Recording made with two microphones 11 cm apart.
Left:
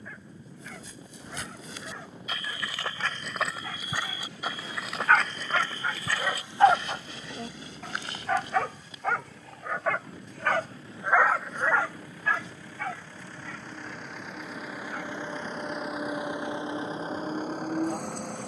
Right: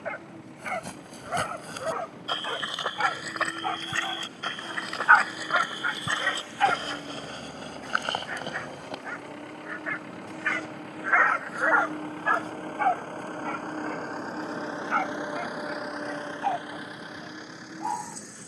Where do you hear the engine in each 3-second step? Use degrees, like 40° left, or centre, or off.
70° right, 70° right, 70° right, 60° right, 40° right, 20° left.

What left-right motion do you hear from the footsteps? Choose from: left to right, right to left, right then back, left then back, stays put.
left then back.